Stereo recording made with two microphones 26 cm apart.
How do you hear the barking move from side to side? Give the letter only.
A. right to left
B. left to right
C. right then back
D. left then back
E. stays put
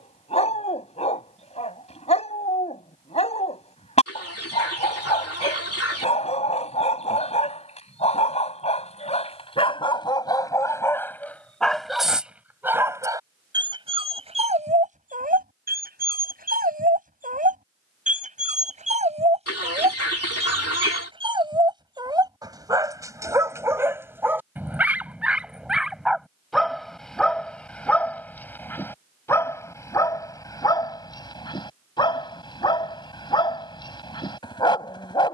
C.